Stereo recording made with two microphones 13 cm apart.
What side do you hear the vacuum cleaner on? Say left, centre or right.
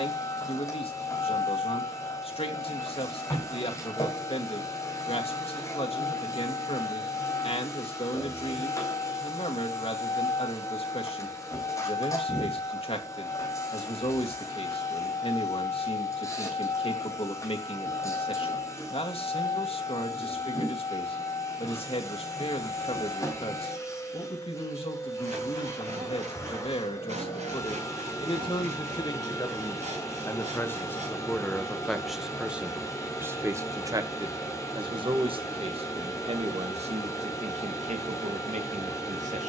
left.